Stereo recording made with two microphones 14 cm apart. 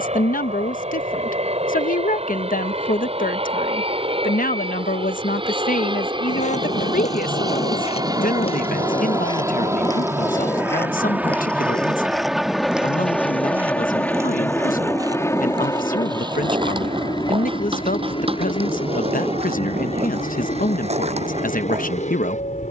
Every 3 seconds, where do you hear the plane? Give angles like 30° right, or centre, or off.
50° right, 40° right, 30° right, 10° right, 10° left, 30° left, 40° left, 50° left.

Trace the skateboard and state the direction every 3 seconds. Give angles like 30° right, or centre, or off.
off, off, 50° left, 20° left, 10° right, 30° right, 40° right, 50° right.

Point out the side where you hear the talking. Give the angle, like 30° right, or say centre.
80° left.